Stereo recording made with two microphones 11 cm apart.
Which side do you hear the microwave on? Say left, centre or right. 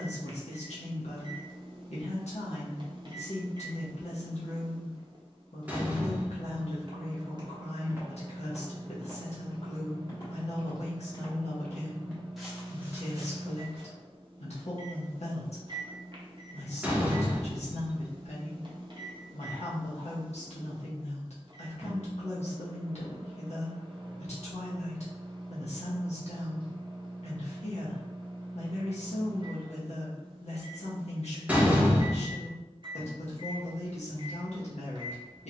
right.